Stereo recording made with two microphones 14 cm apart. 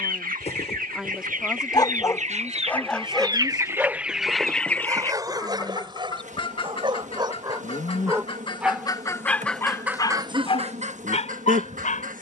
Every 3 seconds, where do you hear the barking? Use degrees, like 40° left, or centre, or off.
30° left, 20° right, 30° right, 40° left.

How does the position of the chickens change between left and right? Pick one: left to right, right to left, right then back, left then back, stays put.
left then back.